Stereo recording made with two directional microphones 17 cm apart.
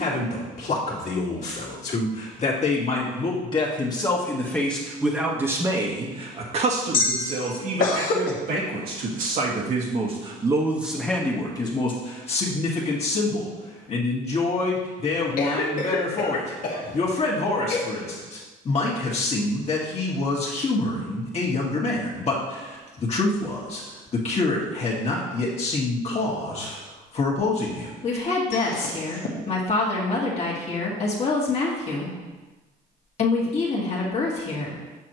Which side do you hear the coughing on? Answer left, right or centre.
left.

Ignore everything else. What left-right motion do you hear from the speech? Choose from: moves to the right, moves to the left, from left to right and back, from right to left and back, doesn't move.
from left to right and back.